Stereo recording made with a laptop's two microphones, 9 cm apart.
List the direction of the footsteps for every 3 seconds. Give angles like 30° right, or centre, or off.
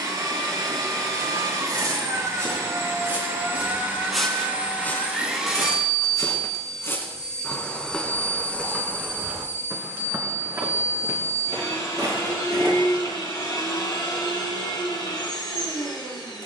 40° right, 10° left, 20° left, 30° right, 40° right, off.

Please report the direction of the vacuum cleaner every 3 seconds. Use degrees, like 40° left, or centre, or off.
40° right, 20° right, 10° left, 30° left, 50° left, 60° left.